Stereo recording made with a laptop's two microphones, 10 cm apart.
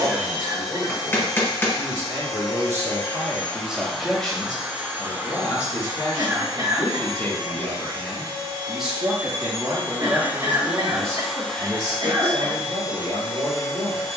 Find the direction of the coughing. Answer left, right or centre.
right.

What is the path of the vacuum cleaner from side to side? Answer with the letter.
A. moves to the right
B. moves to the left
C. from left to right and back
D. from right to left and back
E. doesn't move
C.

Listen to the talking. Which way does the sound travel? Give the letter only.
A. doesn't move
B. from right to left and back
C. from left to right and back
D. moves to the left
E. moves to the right
B.